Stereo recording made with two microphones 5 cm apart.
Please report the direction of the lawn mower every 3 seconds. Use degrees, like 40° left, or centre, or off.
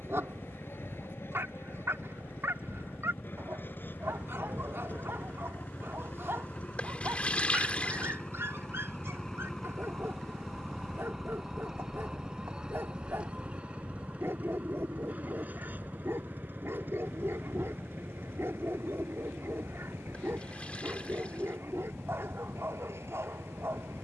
50° left, 40° left, 20° left, centre, 20° right, 40° right, 50° right, 60° right.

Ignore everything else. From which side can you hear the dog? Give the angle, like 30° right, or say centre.
60° right.